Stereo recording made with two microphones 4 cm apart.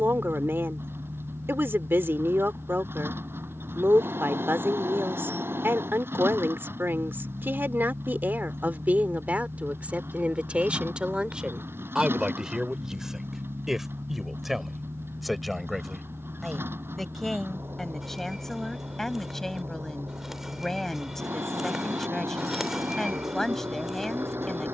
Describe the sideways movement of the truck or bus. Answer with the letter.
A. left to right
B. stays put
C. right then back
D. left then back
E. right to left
B.